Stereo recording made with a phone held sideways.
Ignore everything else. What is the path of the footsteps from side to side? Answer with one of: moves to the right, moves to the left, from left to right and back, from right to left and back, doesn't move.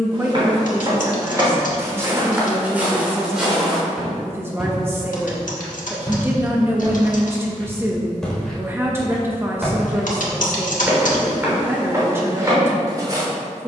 from right to left and back.